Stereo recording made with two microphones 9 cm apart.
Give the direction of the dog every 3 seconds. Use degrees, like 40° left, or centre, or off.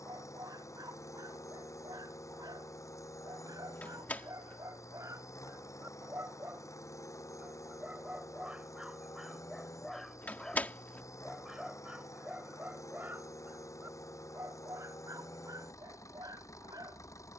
50° right, 40° right, 20° right, centre, 20° right, 40° right.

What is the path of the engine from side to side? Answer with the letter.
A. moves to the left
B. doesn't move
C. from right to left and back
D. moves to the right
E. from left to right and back
B.